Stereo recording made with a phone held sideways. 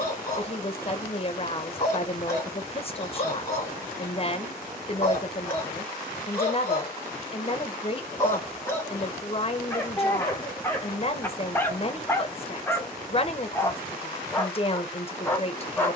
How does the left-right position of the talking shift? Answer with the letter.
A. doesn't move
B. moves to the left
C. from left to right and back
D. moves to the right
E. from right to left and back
A.